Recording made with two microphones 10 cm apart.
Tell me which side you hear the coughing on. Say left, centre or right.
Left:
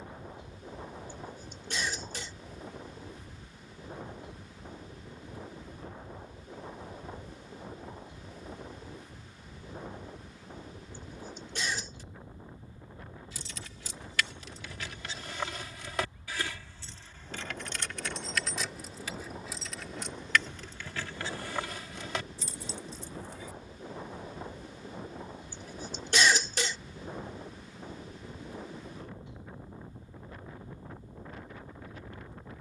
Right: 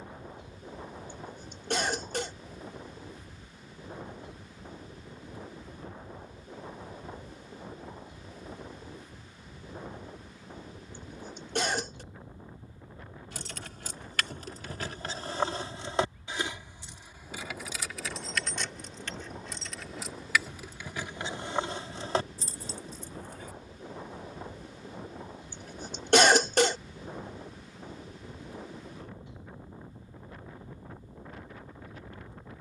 right.